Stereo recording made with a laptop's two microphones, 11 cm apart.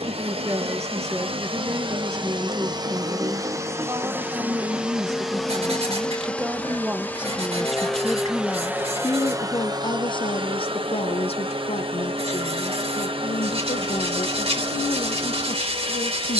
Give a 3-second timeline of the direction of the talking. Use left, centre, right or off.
right, right, centre, left, left, left.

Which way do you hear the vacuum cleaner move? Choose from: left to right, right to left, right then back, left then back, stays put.
left then back.